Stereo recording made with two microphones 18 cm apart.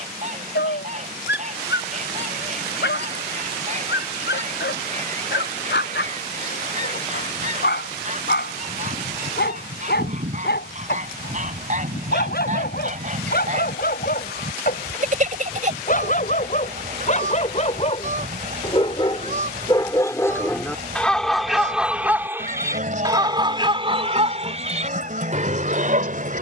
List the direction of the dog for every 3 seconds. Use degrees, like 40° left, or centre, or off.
80° left, 70° left, 70° left, 70° left, 60° left, 50° left, 20° left, 10° right, 40° right.